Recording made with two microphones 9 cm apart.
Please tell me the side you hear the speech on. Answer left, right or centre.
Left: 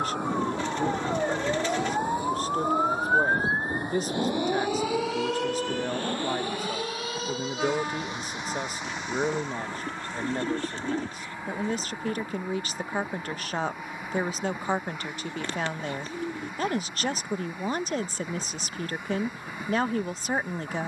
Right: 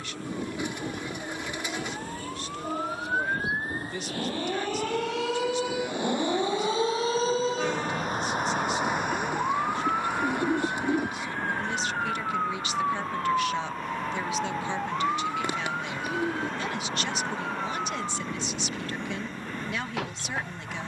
left.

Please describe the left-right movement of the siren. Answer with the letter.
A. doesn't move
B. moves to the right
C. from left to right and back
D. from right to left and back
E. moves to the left
B.